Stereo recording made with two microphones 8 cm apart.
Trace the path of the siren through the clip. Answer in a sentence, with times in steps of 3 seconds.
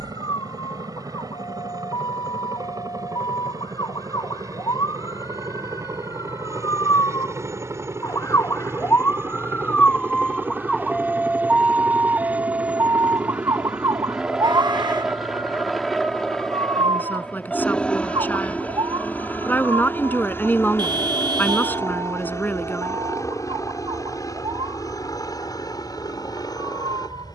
In this clip you hear the siren on the left from 0 s, in the centre from 9 s and on the right from 12 s.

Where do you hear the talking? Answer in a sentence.
You can hear the talking on the left.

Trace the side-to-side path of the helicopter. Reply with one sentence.
In this clip you hear the helicopter move to the left.